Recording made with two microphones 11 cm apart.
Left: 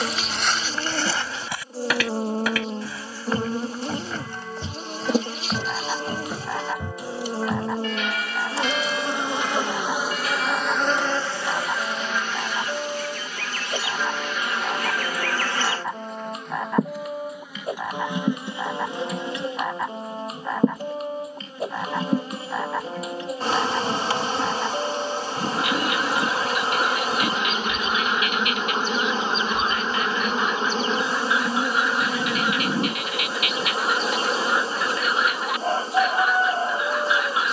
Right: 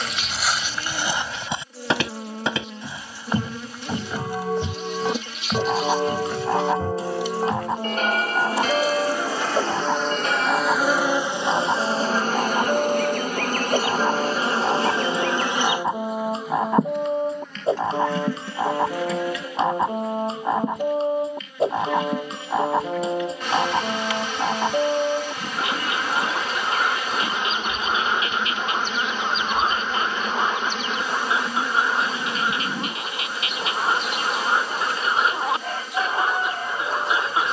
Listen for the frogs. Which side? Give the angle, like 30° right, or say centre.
30° right.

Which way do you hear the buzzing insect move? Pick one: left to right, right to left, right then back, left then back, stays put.
right then back.